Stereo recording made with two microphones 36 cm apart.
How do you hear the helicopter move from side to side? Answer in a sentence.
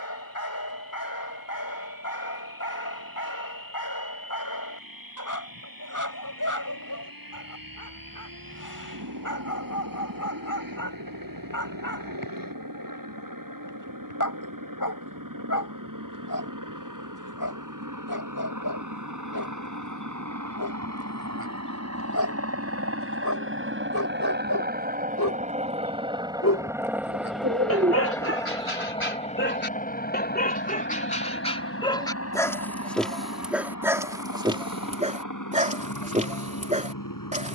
In this clip you hear the helicopter move to the left.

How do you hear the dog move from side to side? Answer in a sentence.
In this clip you hear the dog go from the left side to the right.